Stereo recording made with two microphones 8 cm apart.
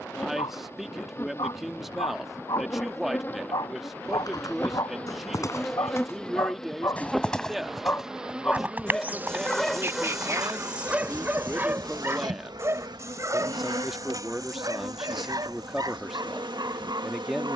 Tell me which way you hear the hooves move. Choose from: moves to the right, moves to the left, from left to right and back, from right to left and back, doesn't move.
moves to the right.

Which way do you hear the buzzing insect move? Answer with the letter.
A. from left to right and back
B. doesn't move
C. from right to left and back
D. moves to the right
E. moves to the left
D.